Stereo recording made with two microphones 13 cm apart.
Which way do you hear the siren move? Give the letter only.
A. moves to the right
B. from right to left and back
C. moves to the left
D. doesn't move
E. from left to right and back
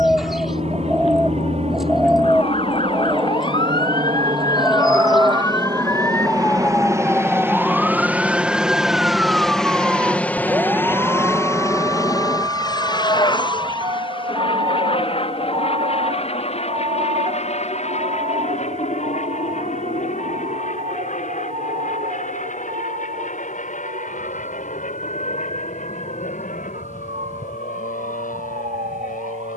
A.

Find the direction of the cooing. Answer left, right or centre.
centre.